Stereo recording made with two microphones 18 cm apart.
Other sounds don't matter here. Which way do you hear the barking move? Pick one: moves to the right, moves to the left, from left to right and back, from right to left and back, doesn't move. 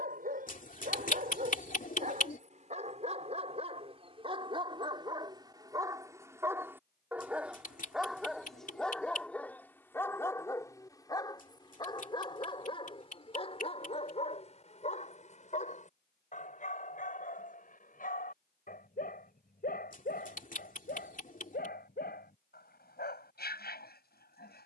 moves to the left.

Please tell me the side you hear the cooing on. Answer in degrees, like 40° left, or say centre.
50° left.